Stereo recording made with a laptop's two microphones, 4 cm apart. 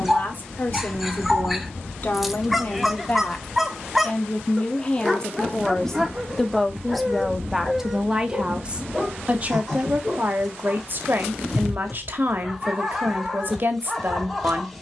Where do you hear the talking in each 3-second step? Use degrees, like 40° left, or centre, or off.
40° left, 30° left, 10° right, 40° right, 40° right.